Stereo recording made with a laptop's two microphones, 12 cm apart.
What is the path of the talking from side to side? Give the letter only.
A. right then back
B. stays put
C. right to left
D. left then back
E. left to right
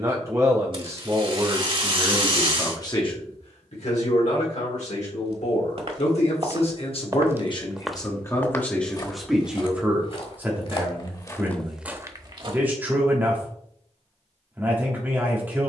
D.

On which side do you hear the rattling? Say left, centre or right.
right.